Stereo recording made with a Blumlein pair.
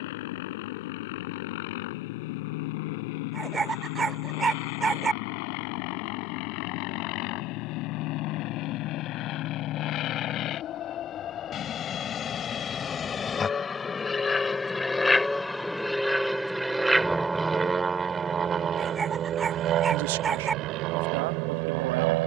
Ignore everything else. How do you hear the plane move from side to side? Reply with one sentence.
In this clip you hear the plane go from the left side to the right.